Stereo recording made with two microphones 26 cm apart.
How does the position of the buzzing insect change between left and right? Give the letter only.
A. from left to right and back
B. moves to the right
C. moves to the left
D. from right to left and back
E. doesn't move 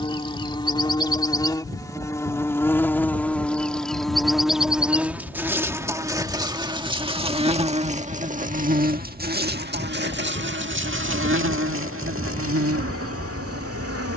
B.